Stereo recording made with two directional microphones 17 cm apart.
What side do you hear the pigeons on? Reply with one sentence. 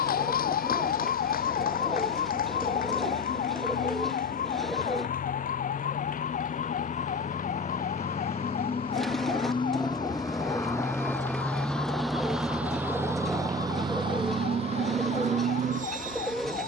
You can hear the pigeons in the centre.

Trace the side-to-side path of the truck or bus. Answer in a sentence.
In this clip you hear the truck or bus move from left to right.